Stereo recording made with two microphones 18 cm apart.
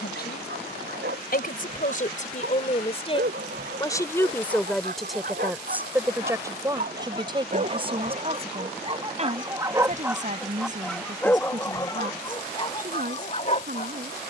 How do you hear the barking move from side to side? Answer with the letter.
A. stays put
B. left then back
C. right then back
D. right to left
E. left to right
D.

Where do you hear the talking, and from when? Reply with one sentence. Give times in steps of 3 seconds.
You can hear the talking on the left from 0 s, in the centre from 3 s and on the right from 6 s.